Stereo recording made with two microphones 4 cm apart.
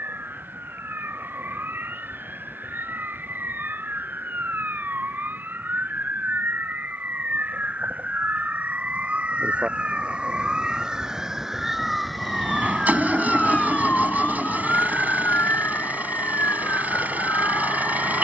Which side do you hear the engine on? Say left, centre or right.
right.